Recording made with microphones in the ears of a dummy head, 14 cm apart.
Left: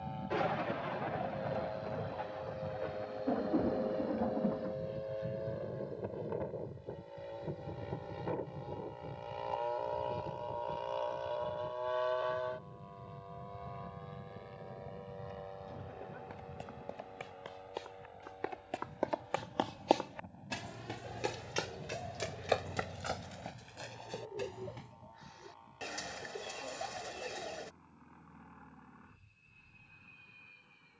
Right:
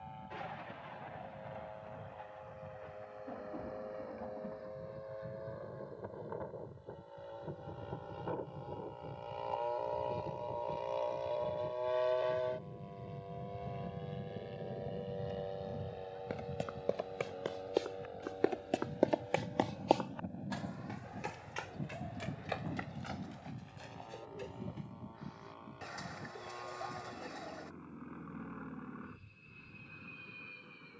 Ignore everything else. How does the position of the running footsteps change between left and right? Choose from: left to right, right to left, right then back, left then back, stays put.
right to left.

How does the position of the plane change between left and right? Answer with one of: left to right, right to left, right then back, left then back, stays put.
left to right.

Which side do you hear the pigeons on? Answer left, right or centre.
left.